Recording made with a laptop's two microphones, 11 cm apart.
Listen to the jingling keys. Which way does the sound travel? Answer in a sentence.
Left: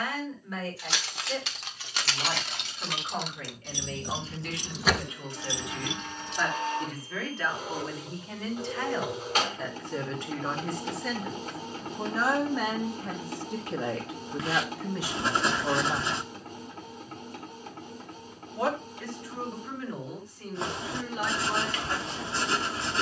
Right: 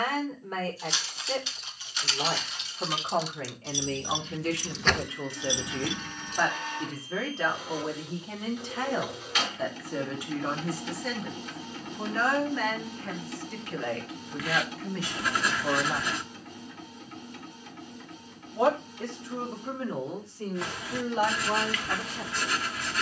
In this clip you hear the jingling keys go from the left side to the right.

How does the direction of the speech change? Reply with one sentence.
You can hear the speech move from right to left and back again.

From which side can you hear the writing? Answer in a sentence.
You can hear the writing on the left.